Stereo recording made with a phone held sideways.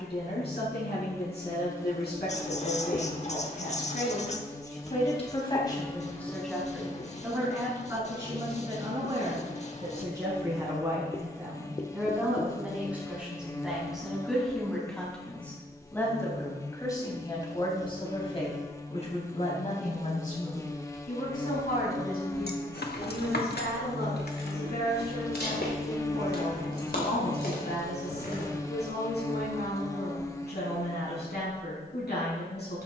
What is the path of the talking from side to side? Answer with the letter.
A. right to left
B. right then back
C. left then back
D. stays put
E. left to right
B.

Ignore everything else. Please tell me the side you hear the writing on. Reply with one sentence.
You can hear the writing on the left.